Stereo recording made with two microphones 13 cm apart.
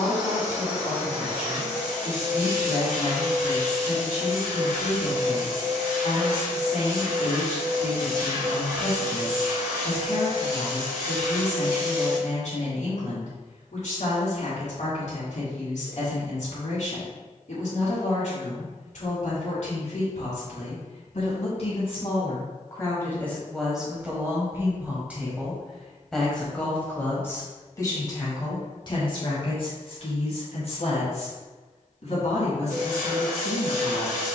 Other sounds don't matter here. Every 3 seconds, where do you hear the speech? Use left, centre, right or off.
left, left, left, left, left, left, left, left, centre, left, left, left.